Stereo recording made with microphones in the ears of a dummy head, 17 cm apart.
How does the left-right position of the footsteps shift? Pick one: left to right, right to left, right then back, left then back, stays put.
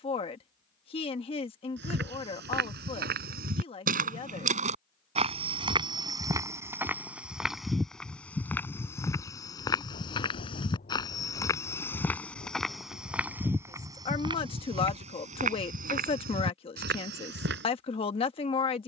left then back.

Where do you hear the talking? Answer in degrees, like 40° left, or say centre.
30° left.